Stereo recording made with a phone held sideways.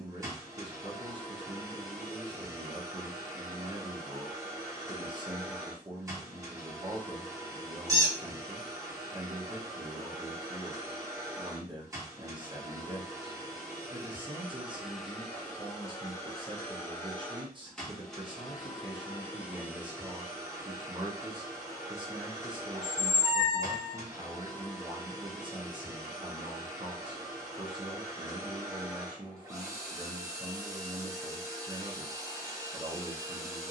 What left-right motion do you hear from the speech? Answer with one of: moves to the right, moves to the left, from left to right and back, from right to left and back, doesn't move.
doesn't move.